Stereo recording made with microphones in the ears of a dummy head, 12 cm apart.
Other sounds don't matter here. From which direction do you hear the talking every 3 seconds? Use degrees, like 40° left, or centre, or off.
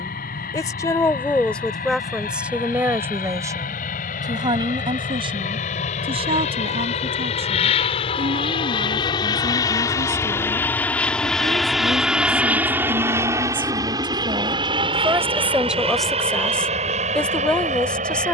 10° left, 30° right, 50° right, 50° right, 40° right, centre.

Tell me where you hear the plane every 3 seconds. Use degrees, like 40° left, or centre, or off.
80° left, 70° left, 50° left, 20° left, 20° right, 40° right.